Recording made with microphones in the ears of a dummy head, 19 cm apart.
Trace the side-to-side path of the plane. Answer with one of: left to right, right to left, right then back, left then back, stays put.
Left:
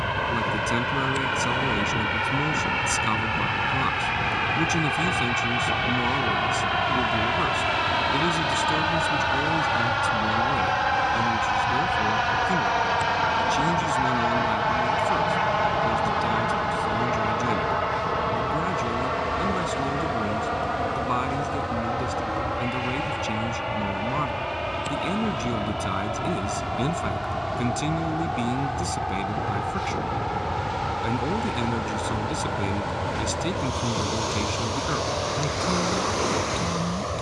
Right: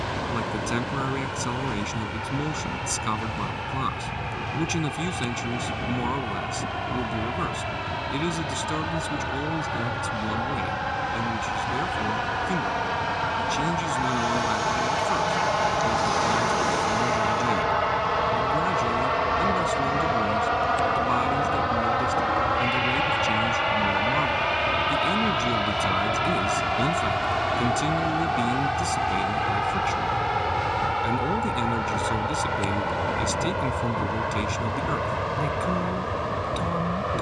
left to right.